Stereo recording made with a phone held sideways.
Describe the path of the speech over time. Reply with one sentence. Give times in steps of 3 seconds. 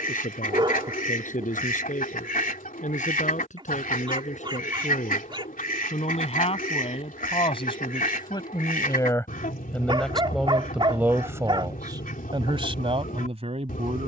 You can hear the speech on the left from 0 s, in the centre from 9 s and on the right from 12 s.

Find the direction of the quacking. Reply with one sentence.
In this clip you hear the quacking on the left.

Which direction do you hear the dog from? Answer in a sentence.
You can hear the dog on the right.